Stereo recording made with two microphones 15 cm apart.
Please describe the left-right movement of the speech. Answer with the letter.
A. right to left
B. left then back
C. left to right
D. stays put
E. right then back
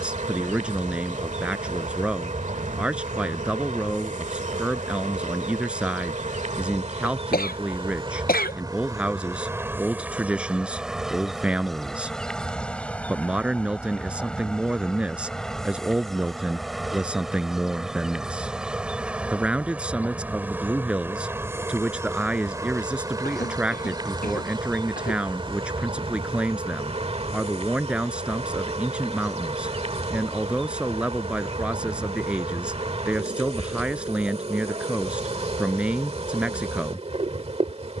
D.